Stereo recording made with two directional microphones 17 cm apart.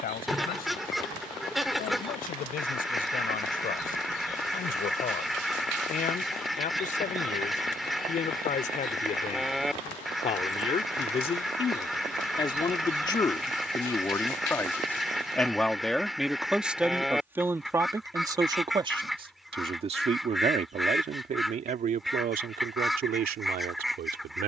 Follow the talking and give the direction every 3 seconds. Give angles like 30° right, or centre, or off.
60° left, 50° left, 50° left, 40° left, 20° left, 10° right, 30° right, 50° right.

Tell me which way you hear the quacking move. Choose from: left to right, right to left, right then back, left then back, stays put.
stays put.